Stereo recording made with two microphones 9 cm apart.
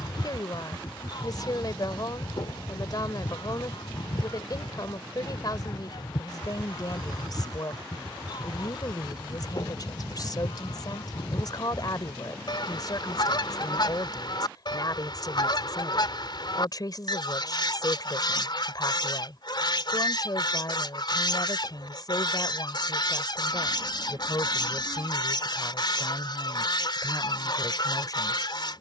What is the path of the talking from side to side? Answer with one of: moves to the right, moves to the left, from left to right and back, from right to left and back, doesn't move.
doesn't move.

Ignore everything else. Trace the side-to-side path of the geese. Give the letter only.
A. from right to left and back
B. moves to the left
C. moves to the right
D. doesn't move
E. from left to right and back
D.